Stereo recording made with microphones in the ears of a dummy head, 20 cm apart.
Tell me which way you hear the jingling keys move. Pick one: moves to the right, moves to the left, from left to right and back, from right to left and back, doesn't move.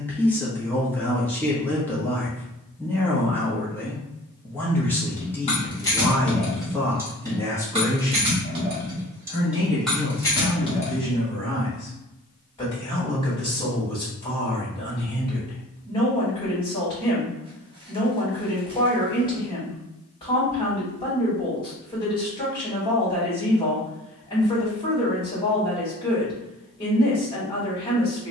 from left to right and back.